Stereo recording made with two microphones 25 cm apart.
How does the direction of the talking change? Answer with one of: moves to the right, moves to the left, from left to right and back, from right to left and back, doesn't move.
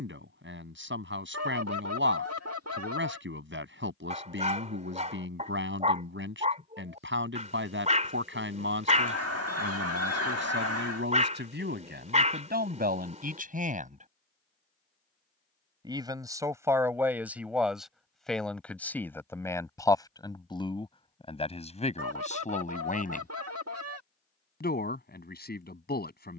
moves to the left.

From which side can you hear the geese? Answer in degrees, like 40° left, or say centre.
70° right.